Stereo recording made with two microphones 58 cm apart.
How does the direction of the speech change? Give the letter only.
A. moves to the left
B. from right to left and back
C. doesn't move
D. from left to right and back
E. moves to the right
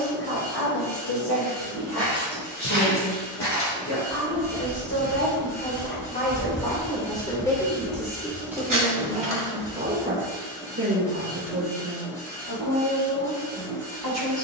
E.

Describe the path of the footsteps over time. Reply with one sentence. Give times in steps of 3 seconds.
In this clip you hear the footsteps on the left from 0 s, on the right from 6 s and not at all from 12 s.